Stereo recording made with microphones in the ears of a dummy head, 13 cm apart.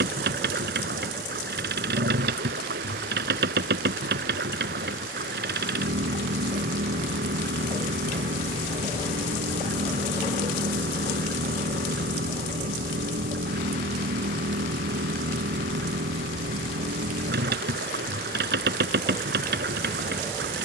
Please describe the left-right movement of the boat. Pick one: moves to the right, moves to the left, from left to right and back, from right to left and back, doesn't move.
doesn't move.